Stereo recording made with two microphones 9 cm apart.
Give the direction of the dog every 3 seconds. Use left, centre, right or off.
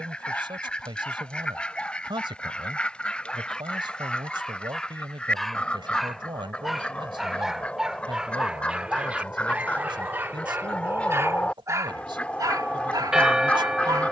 centre, centre, centre, right, right.